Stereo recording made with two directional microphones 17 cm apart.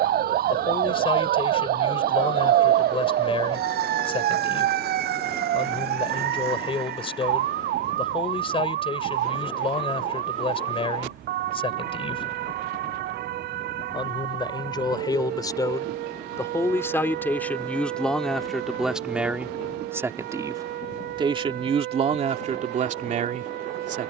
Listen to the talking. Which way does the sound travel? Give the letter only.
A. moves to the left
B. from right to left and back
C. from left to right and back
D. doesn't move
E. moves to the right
E.